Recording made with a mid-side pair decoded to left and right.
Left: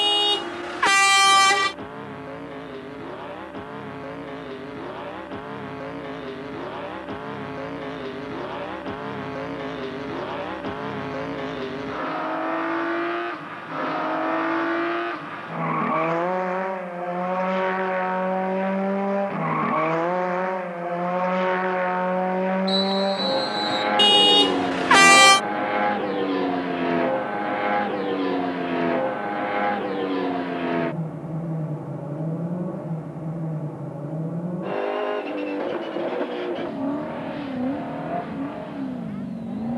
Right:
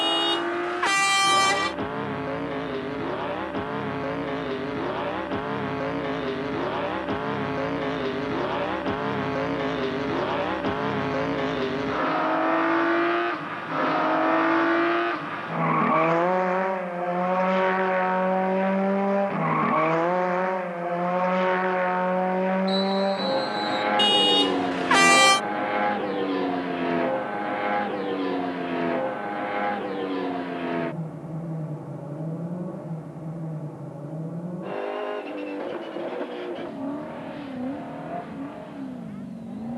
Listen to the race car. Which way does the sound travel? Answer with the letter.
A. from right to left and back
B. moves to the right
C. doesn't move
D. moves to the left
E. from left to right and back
D.